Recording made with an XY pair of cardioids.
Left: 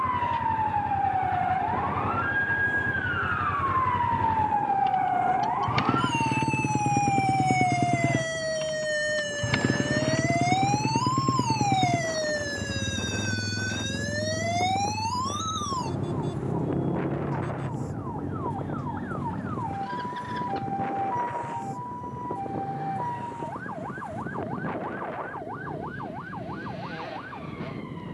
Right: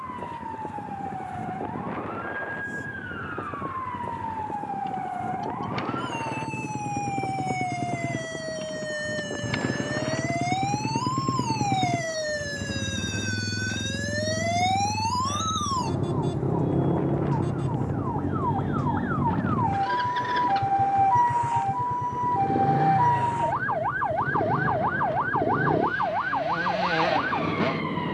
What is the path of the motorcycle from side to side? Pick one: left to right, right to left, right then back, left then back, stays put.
left to right.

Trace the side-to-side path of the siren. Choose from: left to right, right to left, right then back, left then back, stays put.
left to right.